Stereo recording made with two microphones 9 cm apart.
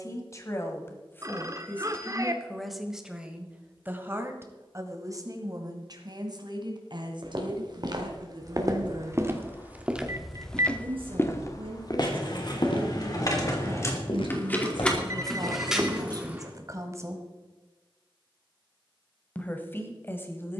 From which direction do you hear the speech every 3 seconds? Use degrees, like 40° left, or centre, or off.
20° left, 30° right, 60° right, 70° right, 60° right, 40° right, 20° left.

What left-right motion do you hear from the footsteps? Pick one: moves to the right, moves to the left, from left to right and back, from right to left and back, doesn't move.
moves to the left.